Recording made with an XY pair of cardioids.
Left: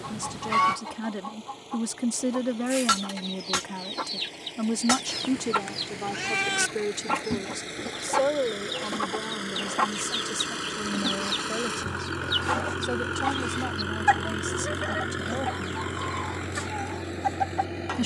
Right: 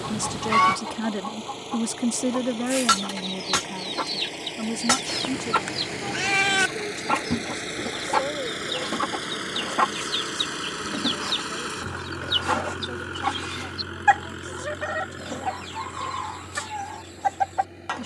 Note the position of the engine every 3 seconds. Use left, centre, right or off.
right, right, right, centre, left, left.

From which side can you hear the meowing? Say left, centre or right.
right.